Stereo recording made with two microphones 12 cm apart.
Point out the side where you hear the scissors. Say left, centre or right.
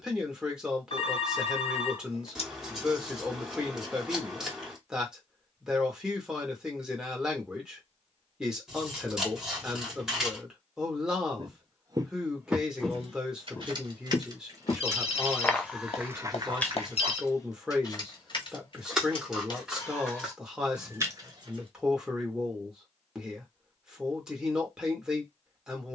centre.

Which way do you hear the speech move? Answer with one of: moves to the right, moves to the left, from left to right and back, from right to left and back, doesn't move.
doesn't move.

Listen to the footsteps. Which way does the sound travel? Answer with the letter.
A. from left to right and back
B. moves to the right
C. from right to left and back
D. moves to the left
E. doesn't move
C.